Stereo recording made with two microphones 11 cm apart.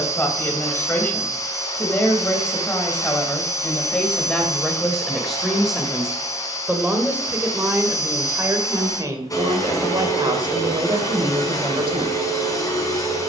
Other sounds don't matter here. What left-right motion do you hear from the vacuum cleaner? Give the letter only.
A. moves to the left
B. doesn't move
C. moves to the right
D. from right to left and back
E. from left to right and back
B.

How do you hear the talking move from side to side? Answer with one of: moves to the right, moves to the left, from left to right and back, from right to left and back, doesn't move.
moves to the right.